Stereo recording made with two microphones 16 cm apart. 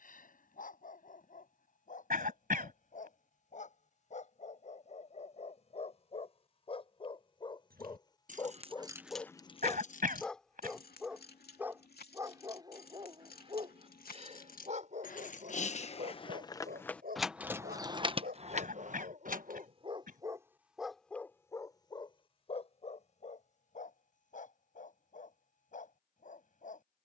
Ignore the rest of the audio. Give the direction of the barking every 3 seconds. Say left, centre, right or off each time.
left, left, left, centre, right, right, right, left, left.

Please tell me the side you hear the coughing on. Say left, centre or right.
right.